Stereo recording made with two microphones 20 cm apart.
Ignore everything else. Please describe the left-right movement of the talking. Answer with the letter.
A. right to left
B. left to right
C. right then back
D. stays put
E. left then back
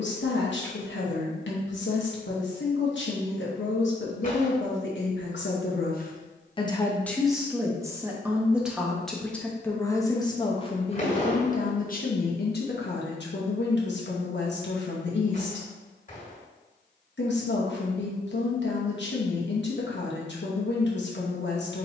C.